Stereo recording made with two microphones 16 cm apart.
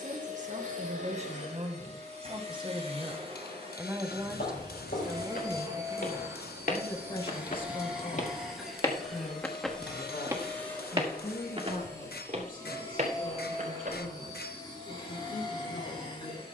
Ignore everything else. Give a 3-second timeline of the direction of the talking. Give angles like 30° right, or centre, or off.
40° right, centre, 30° left, 50° left, 60° left, 60° left.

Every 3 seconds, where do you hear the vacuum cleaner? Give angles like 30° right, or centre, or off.
50° right, 30° right, 10° right, 10° left, 20° left, 30° left.